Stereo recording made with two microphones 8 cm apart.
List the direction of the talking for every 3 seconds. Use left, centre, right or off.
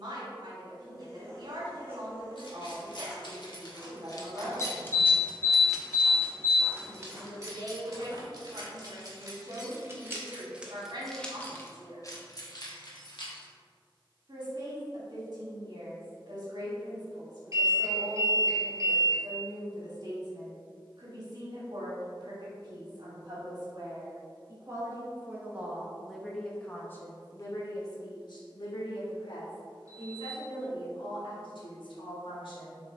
right, right, right, right, right, right, right, right, centre, left, left.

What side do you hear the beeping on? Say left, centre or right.
right.